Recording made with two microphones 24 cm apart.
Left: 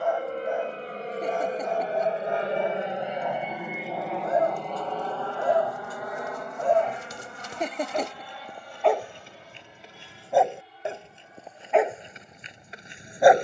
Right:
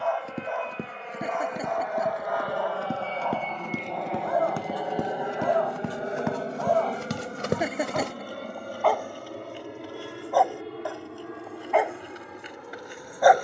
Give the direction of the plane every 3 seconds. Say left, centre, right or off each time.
left, centre, right, right, right.